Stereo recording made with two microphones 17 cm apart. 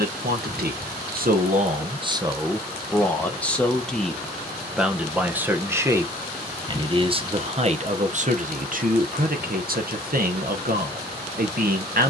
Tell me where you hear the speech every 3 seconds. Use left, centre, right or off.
right, centre, right, right.